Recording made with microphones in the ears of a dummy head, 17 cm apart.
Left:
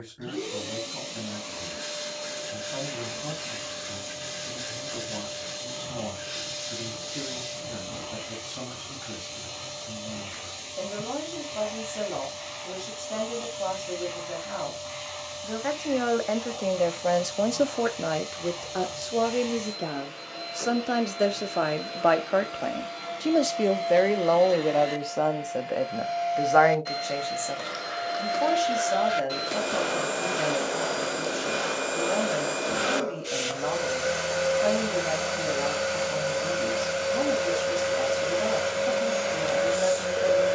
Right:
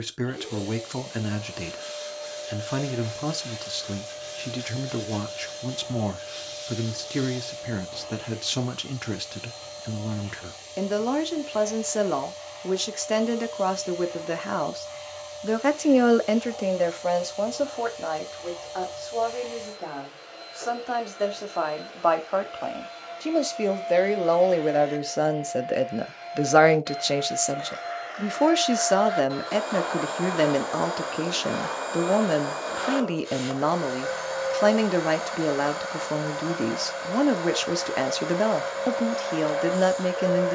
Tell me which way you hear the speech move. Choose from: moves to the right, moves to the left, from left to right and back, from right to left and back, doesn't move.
from right to left and back.